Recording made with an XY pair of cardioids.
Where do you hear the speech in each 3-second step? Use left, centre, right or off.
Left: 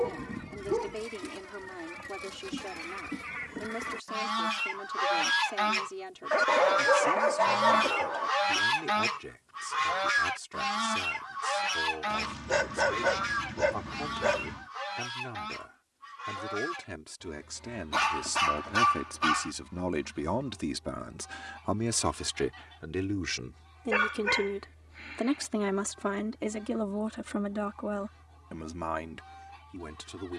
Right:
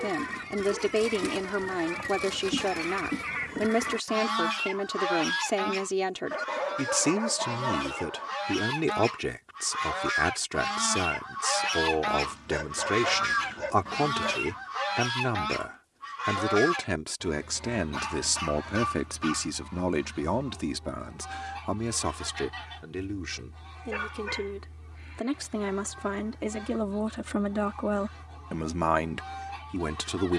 right, right, right, right, right, right, right, centre, centre, right.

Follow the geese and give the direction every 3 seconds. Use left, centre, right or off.
right, centre, left, centre, right, right, right, right, right, right.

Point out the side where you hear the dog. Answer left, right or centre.
left.